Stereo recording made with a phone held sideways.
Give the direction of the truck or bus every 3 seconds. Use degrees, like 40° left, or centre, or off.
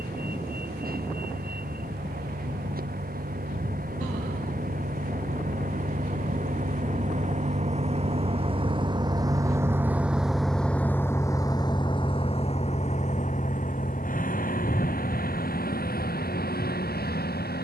70° right, 60° right, 50° right, centre, 50° left, 70° left.